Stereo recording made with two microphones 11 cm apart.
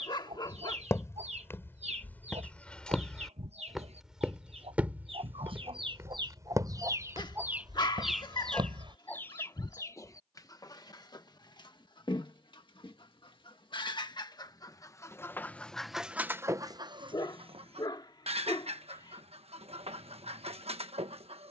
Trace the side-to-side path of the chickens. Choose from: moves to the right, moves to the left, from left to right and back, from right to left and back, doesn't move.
from right to left and back.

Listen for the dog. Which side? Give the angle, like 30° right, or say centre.
40° left.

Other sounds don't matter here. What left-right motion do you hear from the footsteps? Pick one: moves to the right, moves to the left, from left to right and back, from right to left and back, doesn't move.
moves to the right.